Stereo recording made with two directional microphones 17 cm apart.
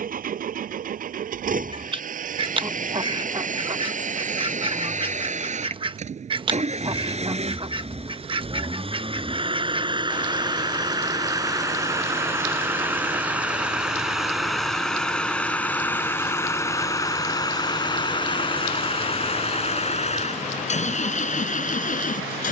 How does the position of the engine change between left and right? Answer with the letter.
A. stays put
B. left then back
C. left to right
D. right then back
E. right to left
E.